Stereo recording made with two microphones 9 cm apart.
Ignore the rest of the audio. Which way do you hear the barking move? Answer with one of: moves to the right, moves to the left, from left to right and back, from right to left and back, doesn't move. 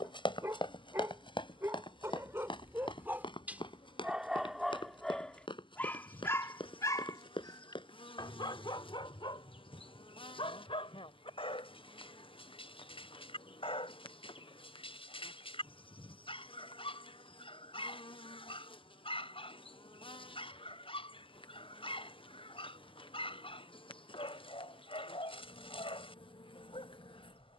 moves to the left.